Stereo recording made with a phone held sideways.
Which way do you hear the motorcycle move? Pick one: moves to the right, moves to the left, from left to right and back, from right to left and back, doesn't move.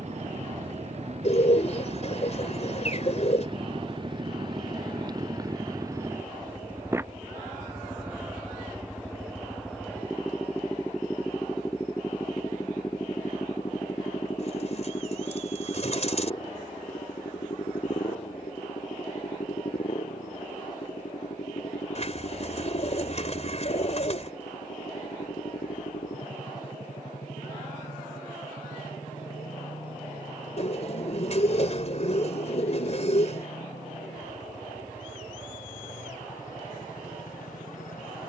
moves to the left.